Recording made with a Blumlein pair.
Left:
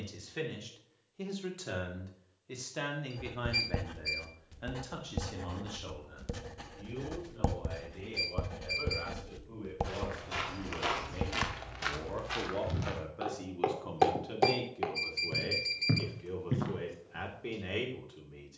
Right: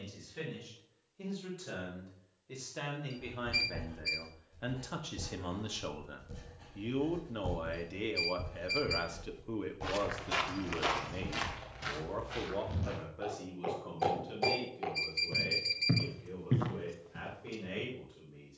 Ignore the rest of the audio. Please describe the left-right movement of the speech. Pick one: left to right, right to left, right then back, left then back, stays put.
right then back.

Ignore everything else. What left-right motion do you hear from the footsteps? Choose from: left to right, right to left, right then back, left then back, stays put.
left then back.